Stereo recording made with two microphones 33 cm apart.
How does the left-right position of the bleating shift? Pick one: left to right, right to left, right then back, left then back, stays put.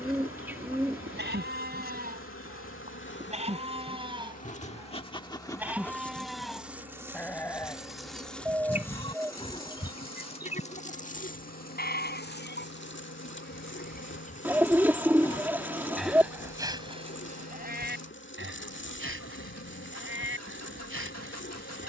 left then back.